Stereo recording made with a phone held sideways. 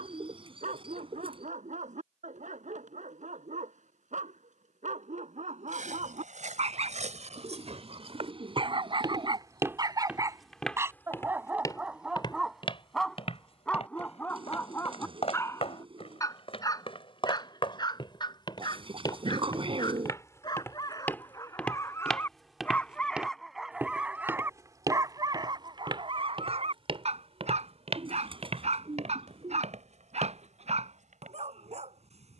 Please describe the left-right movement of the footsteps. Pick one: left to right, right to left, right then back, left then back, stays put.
left then back.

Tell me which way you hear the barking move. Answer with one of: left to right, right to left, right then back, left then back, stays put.
left then back.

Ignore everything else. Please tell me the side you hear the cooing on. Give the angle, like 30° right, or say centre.
40° right.